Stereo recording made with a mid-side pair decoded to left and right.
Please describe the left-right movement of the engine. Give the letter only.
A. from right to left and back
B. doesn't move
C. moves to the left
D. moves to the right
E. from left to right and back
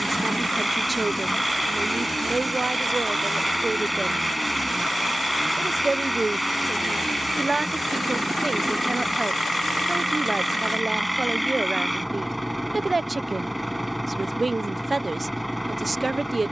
B.